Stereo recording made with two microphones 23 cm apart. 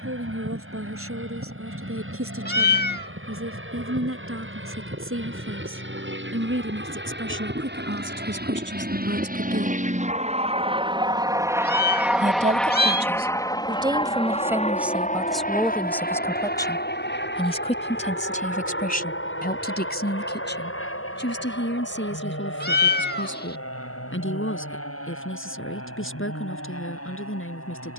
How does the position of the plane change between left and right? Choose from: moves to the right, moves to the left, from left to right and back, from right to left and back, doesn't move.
moves to the left.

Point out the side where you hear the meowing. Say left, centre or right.
left.